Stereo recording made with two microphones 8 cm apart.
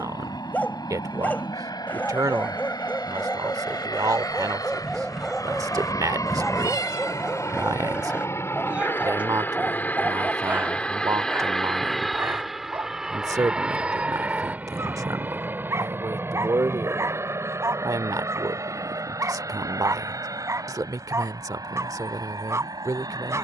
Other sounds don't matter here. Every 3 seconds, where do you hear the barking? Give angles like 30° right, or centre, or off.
20° left, 10° left, 10° right, 20° right, 30° right, 40° right, 40° right, 40° right.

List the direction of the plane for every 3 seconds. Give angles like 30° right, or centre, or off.
70° left, 60° left, 40° left, 20° left, 10° right, 30° right, 40° right, 50° right.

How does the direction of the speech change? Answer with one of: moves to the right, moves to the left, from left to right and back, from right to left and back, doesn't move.
doesn't move.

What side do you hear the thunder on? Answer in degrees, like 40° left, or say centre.
centre.